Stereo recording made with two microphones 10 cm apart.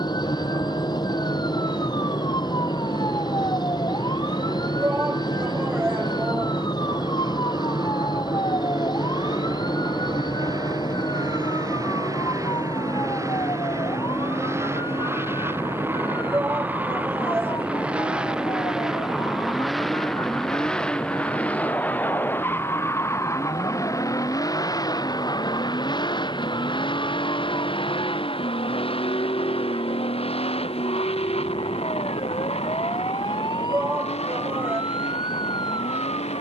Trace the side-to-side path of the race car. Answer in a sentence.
You can hear the race car go from the right side to the left.